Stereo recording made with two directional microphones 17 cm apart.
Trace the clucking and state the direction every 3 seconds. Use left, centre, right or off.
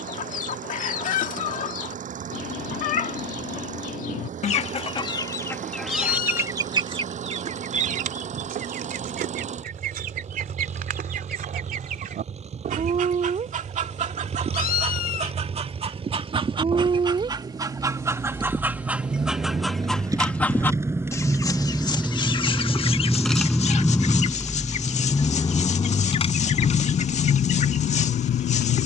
left, left, right, right, right, right, centre, left, left, left.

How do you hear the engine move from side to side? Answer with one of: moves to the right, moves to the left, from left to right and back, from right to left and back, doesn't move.
moves to the left.